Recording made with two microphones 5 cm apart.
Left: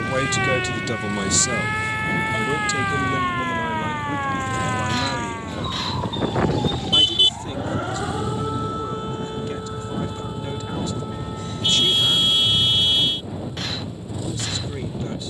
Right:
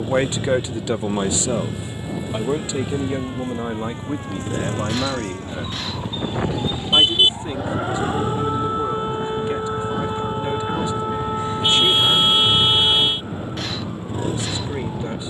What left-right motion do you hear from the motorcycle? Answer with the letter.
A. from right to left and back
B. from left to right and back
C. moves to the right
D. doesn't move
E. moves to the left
D.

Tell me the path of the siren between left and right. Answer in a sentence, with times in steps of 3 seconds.
In this clip you hear the siren on the left from 0 s, in the centre from 6 s and on the right from 9 s.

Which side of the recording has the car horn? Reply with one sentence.
In this clip you hear the car horn on the right.